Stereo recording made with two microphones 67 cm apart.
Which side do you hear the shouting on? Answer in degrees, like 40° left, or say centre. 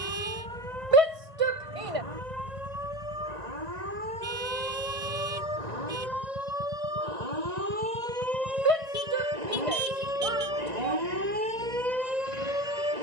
50° right.